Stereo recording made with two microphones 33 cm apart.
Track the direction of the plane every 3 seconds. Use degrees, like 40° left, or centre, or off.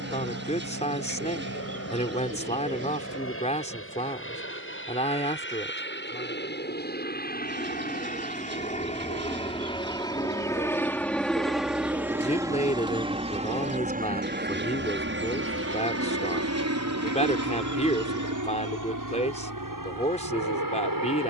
50° left, 40° left, 30° left, 10° left, 20° right, 50° right, 60° right.